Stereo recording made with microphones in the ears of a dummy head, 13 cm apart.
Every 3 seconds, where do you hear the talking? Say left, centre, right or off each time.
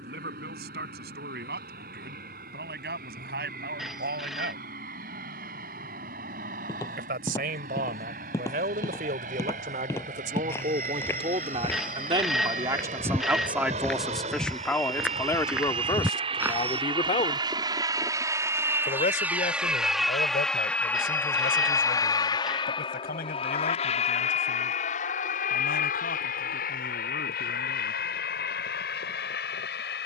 right, right, right, right, centre, left, left, left, left, left.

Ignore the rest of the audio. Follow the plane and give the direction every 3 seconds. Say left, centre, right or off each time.
right, right, right, right, right, right, centre, left, left, left.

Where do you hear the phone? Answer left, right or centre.
centre.